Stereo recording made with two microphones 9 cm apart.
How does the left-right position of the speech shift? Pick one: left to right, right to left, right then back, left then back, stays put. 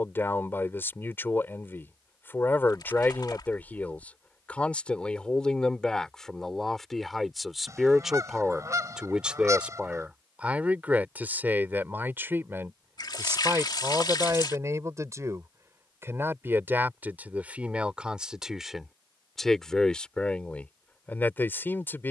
right then back.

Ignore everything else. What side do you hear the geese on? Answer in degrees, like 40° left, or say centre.
40° right.